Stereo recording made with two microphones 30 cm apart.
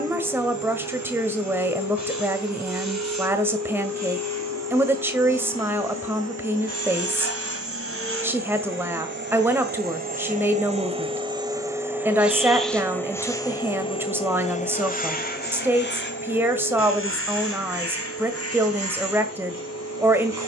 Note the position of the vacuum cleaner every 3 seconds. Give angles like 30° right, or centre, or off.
70° right, 60° right, 50° right, 20° right, 10° left, 40° left, 50° left.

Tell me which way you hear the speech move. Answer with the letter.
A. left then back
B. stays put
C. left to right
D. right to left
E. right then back
B.